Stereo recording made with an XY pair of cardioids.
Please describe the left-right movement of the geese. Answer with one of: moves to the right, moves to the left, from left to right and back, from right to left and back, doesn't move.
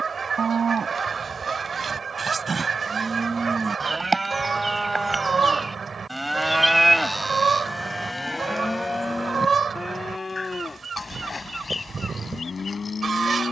doesn't move.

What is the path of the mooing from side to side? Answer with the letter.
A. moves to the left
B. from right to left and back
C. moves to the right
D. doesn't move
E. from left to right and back
A.